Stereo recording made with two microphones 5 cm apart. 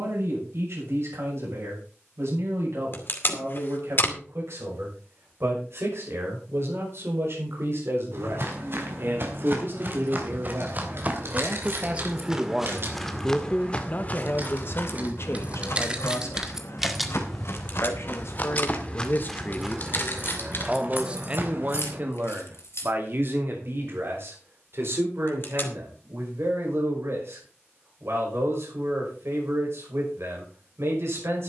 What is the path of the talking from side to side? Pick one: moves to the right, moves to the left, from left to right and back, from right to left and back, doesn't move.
from right to left and back.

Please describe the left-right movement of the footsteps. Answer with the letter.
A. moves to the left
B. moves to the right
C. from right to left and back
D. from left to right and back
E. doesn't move
C.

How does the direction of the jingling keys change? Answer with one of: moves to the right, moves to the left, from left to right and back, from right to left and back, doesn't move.
moves to the left.